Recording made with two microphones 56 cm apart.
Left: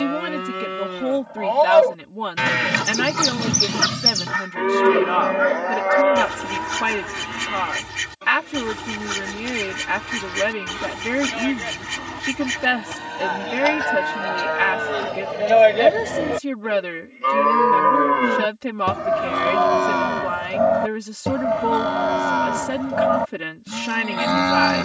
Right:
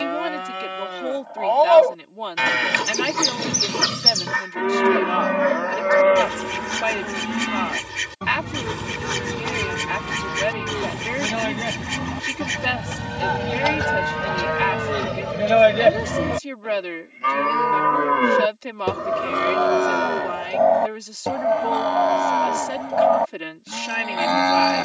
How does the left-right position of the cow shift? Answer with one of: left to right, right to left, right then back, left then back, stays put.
right then back.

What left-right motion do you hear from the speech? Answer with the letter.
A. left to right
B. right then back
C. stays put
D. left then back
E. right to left
C.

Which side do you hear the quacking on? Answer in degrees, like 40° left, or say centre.
10° left.